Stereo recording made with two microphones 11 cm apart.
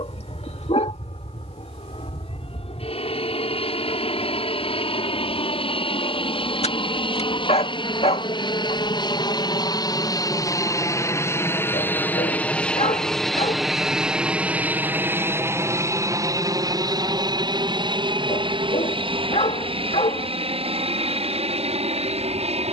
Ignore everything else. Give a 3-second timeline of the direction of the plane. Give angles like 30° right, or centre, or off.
70° left, 60° left, 50° left, 30° left, centre, 30° right, 50° right, 60° right.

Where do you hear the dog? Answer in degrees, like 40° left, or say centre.
70° left.